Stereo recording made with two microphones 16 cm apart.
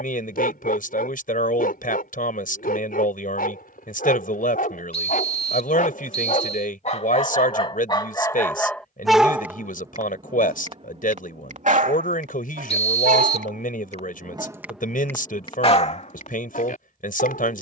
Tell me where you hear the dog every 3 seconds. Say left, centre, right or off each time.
left, left, left, right, right, left.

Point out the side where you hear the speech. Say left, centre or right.
left.